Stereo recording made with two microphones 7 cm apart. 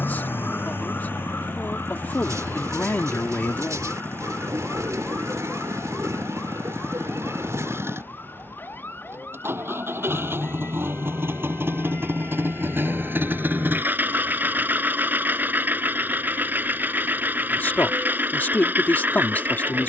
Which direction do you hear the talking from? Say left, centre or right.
left.